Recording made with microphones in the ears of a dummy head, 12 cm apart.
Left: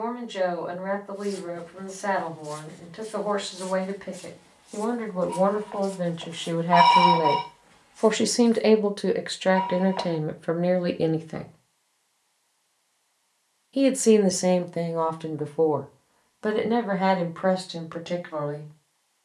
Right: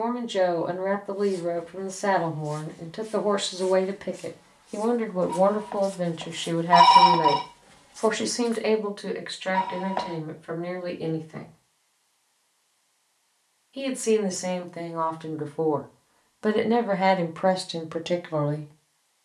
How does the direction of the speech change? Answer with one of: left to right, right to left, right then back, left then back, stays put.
left then back.